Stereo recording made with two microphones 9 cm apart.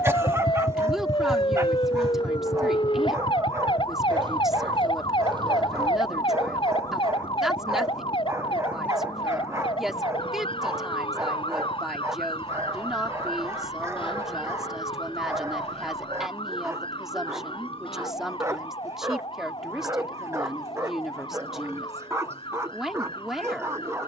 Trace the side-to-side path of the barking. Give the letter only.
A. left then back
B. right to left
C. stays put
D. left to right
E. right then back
C.